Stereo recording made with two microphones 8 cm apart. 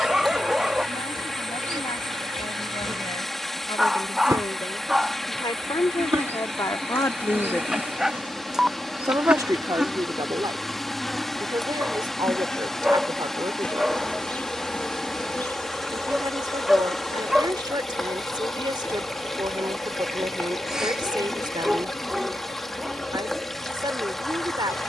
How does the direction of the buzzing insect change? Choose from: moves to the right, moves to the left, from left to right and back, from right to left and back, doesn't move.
moves to the left.